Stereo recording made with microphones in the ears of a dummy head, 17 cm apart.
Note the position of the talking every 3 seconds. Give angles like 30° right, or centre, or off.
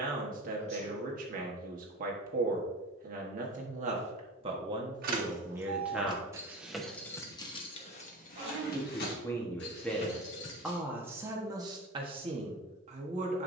40° right, 30° right, 10° left, centre, 30° right.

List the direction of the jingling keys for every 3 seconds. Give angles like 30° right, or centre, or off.
off, 40° right, 20° left, 60° left, off.